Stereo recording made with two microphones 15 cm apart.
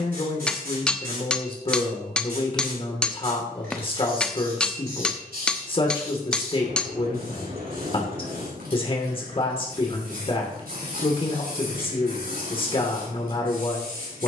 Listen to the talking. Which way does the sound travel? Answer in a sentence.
You can hear the talking stay in one place.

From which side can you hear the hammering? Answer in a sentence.
You can hear the hammering in the centre.